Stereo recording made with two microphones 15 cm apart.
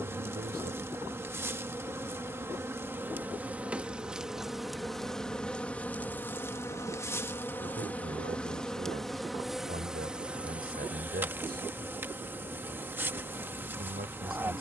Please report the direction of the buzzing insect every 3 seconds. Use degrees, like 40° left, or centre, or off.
20° right, centre, 10° left, 10° right, 10° right.